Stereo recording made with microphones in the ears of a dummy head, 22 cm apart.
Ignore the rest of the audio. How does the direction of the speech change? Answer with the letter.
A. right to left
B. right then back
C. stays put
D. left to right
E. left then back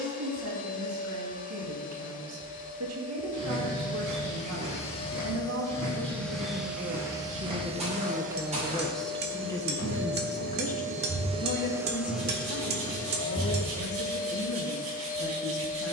A.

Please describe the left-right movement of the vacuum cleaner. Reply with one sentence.
In this clip you hear the vacuum cleaner move from left to right and back again.